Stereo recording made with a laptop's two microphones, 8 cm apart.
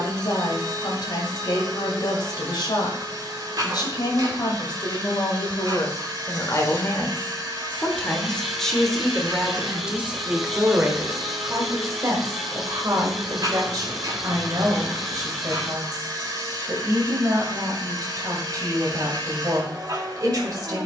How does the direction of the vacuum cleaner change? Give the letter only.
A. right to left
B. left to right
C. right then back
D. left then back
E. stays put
E.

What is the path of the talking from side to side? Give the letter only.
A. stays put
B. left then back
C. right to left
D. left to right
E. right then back
D.